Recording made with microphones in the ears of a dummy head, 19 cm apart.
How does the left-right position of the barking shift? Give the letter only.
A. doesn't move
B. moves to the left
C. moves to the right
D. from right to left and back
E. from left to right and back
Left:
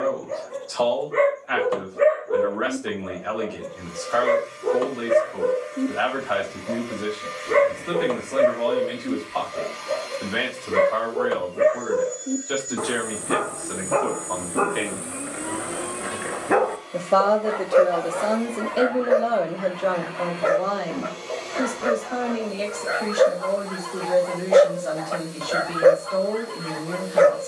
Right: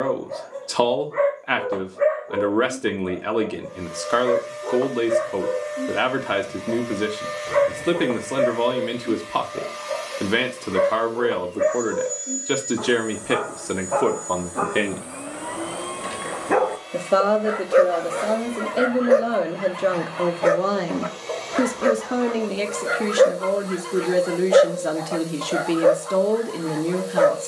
E.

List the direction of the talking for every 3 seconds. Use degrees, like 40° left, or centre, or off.
70° right, 70° right, 70° right, 70° right, 60° right, 10° right, 20° right, 70° right, 70° right.